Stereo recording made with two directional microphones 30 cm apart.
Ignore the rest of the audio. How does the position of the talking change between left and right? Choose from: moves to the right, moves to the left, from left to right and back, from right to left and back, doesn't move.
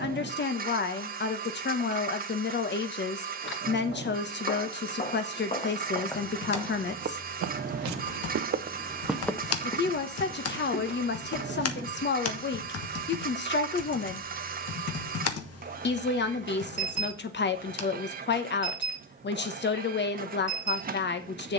doesn't move.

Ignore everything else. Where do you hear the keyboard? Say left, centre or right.
left.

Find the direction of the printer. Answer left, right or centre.
right.